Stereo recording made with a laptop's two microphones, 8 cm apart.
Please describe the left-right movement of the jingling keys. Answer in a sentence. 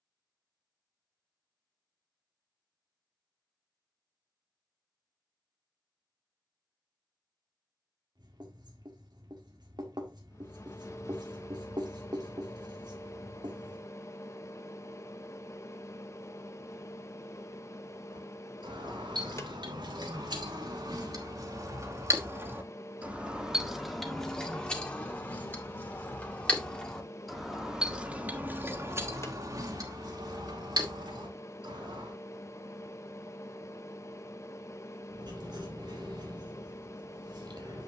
You can hear the jingling keys move from right to left and back again.